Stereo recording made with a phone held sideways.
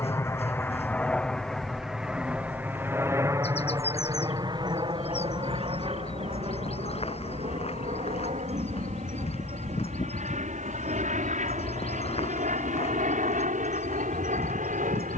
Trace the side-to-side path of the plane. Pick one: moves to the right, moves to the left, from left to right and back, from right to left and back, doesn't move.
moves to the right.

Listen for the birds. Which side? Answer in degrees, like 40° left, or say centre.
50° left.